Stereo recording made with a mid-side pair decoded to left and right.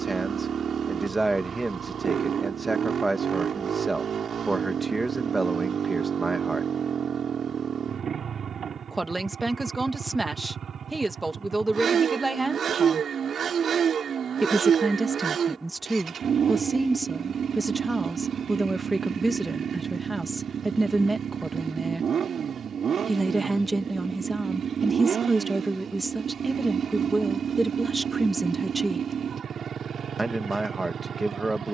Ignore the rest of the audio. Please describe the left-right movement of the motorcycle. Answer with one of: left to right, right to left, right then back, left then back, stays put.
stays put.